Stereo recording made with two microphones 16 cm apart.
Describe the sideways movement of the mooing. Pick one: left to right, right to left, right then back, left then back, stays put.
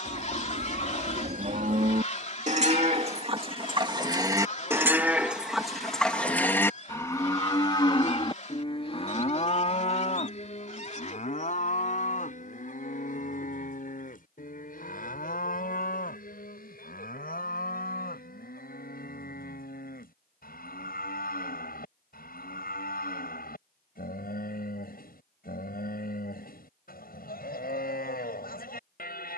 right to left.